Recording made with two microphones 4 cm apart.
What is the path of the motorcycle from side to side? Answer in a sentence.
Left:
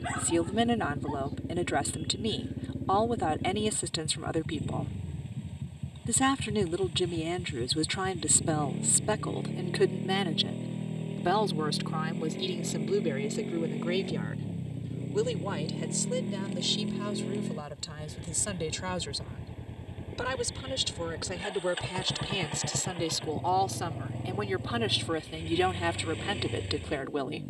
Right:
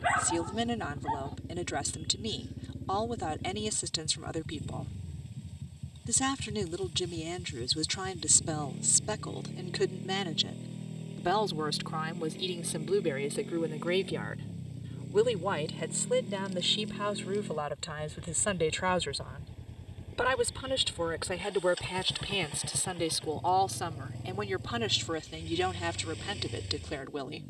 In this clip you hear the motorcycle stay in one place.